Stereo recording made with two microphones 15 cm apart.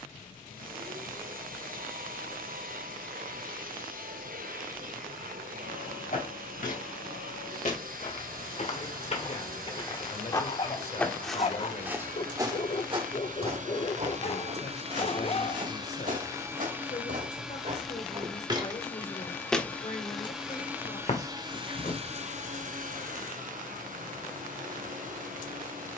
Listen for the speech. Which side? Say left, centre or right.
left.